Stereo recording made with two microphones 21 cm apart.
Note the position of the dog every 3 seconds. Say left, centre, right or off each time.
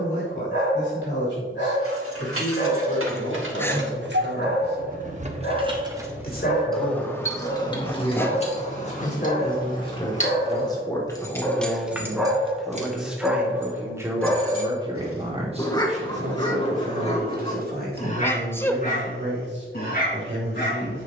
left, left, left, left, centre, left, left.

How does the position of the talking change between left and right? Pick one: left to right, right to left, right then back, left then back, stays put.
left to right.